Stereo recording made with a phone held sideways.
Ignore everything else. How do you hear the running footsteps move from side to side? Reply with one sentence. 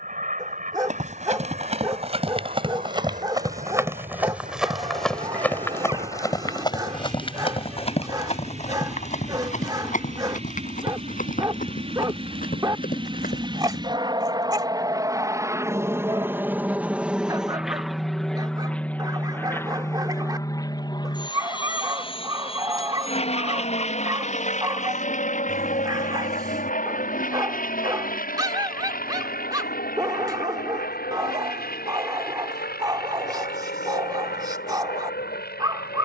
In this clip you hear the running footsteps travel towards the left.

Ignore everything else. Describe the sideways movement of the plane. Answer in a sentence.
In this clip you hear the plane move from right to left.